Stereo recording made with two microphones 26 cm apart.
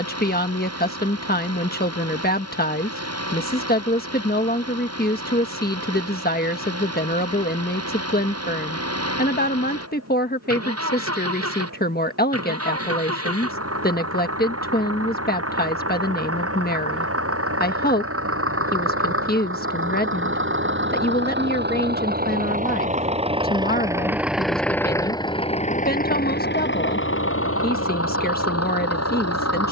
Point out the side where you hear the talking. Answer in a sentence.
In this clip you hear the talking on the left.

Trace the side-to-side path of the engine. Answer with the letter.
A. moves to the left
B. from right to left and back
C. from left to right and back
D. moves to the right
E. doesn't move
A.